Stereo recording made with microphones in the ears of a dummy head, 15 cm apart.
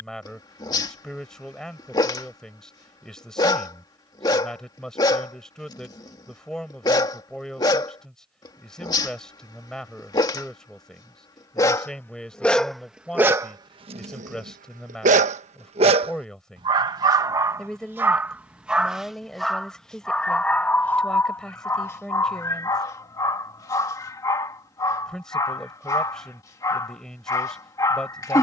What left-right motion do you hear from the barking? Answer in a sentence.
In this clip you hear the barking move from left to right and back again.